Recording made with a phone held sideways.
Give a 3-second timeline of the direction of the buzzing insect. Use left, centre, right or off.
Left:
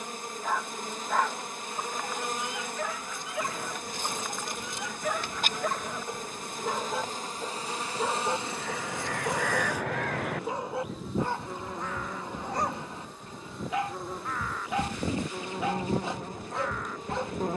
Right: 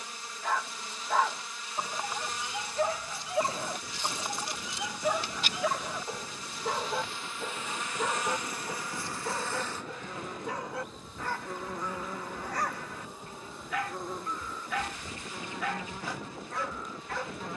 left, left, left, centre, centre, left.